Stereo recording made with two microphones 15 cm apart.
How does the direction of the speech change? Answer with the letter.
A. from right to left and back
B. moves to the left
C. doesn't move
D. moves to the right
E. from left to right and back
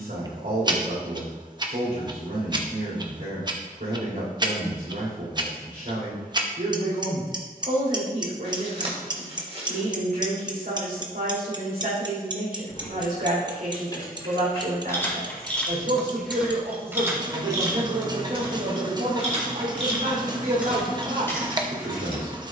C.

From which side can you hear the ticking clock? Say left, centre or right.
right.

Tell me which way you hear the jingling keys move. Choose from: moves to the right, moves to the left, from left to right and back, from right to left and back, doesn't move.
from left to right and back.